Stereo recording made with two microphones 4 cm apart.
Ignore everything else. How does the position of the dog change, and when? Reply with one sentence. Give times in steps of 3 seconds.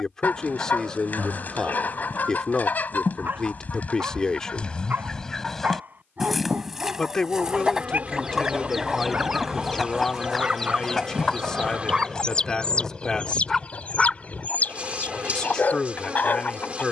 You can hear the dog on the right from 0 s, in the centre from 12 s and on the left from 15 s.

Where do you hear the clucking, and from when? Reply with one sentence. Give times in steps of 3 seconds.
In this clip you hear the clucking on the left from 0 s, in the centre from 6 s and on the left from 12 s.